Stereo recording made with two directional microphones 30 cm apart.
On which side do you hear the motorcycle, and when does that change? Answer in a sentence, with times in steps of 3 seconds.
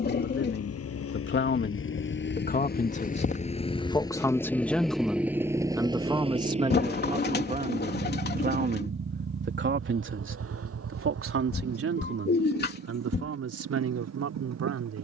In this clip you hear the motorcycle on the left from 0 s, in the centre from 3 s and on the right from 6 s.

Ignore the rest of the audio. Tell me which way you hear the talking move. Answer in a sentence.
You can hear the talking travel towards the right.